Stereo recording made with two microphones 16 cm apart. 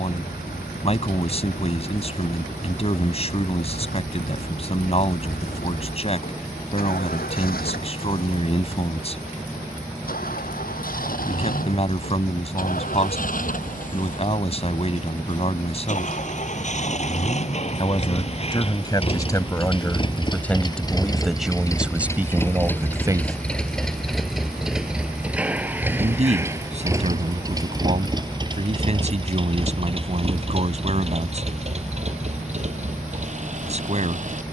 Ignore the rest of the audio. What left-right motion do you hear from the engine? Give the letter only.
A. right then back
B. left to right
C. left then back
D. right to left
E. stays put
B.